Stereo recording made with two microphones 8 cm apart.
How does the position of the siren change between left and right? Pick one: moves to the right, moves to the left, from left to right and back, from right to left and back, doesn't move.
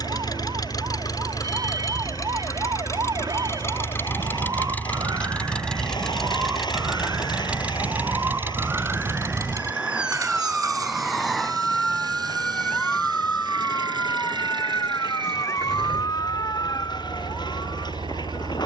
moves to the left.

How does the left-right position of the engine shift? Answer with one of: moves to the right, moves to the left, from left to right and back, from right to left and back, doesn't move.
moves to the right.